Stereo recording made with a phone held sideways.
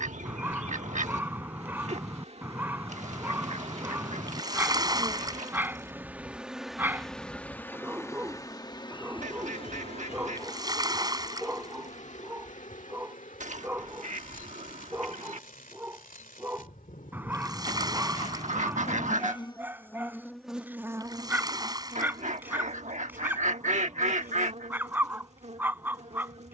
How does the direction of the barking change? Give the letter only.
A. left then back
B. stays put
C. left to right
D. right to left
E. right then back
B.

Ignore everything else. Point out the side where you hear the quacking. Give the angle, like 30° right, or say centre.
60° right.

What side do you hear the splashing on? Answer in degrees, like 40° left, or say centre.
30° right.